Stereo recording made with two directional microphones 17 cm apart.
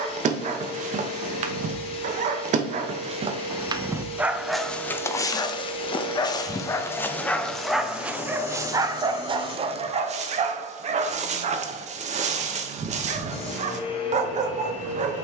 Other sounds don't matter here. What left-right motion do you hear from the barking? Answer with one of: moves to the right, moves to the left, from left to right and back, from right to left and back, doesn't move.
from right to left and back.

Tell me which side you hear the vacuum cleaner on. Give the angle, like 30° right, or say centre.
40° left.